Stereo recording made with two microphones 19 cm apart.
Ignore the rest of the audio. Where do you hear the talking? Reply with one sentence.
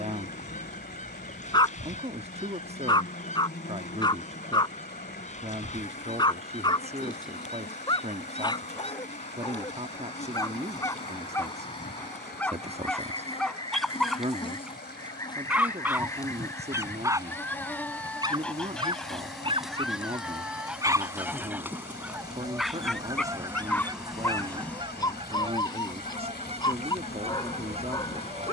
You can hear the talking on the right.